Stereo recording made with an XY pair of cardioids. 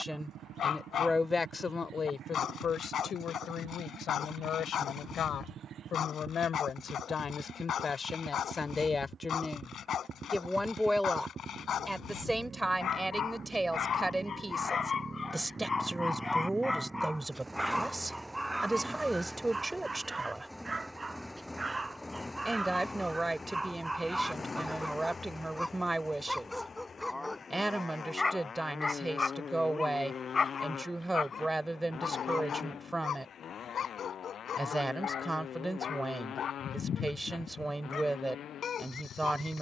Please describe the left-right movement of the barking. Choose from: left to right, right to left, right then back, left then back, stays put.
right then back.